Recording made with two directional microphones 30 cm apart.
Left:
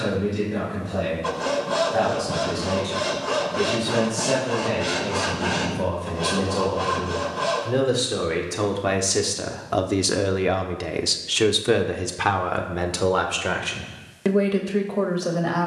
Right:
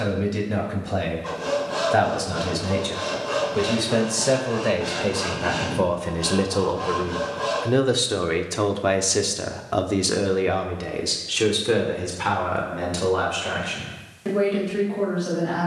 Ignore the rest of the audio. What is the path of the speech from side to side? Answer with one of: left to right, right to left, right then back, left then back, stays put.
right to left.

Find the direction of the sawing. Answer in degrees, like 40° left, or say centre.
50° left.